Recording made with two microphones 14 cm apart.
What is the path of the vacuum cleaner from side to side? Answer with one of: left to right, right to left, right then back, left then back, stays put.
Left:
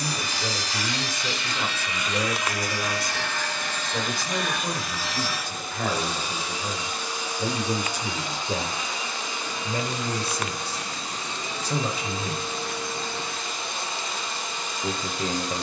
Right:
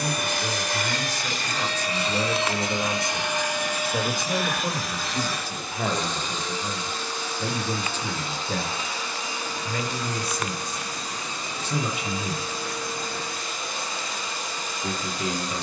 right to left.